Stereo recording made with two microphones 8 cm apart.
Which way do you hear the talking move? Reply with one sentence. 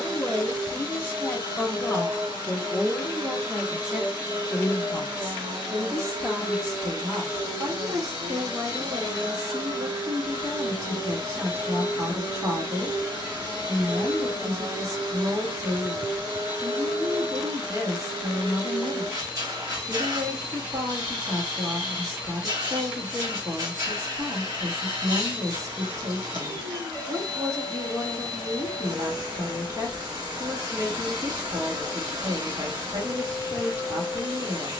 You can hear the talking move to the right.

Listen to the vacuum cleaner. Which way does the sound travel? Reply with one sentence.
In this clip you hear the vacuum cleaner stay in one place.